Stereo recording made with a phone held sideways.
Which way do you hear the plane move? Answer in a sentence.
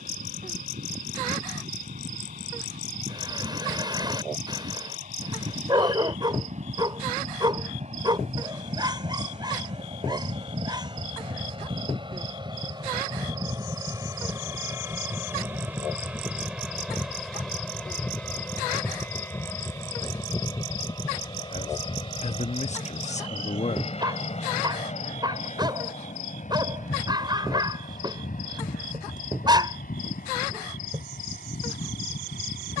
You can hear the plane move from right to left.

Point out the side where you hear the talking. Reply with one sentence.
In this clip you hear the talking on the left.